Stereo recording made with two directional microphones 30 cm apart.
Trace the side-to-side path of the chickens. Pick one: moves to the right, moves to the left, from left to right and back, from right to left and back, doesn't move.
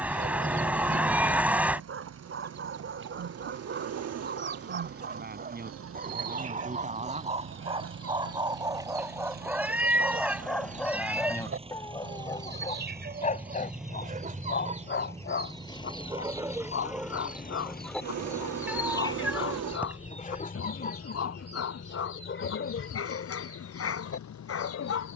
moves to the left.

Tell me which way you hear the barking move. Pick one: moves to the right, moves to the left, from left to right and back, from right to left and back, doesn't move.
moves to the left.